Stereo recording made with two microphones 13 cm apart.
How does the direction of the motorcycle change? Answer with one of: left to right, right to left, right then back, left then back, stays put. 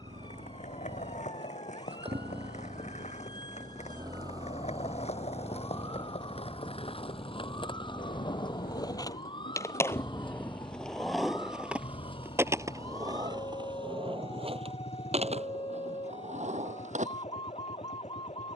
right to left.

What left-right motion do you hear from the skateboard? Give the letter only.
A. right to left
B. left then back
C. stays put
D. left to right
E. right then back
D.